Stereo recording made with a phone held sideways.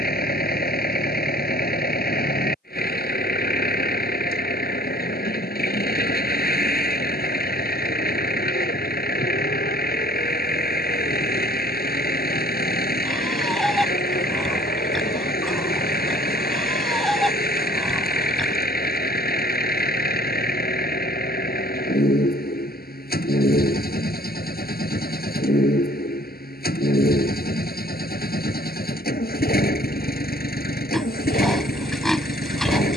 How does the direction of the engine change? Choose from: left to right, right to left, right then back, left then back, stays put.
stays put.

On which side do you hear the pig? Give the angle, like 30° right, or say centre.
centre.